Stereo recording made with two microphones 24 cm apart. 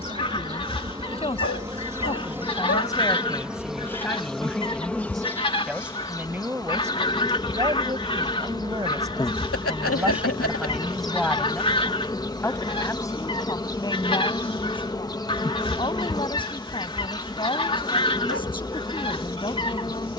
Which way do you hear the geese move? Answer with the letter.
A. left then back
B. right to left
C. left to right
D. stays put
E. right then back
D.